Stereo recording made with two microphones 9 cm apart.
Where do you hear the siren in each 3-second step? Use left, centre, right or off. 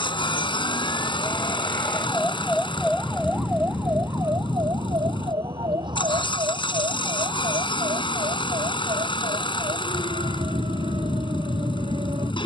left, right, right, right.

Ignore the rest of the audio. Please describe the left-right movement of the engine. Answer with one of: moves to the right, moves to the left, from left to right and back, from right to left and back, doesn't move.
doesn't move.